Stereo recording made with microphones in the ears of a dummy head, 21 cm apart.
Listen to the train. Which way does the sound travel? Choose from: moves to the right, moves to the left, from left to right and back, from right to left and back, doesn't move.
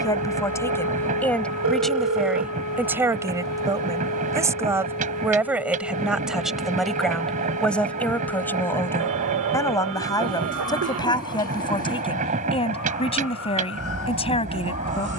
doesn't move.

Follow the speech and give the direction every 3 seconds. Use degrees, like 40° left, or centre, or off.
centre, 10° right, centre, 20° left, 30° left.